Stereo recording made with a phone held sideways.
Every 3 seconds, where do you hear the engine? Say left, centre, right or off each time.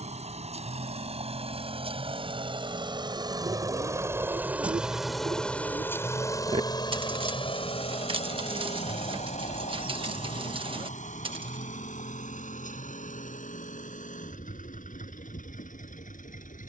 right, centre, left, left, left, left.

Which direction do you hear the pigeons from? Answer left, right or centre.
right.